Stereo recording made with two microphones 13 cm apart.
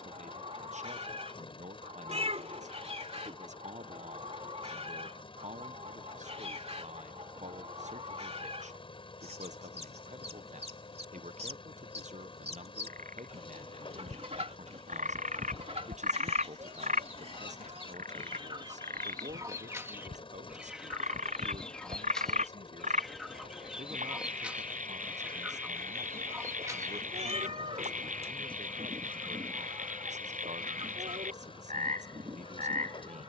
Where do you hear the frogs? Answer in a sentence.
In this clip you hear the frogs on the right.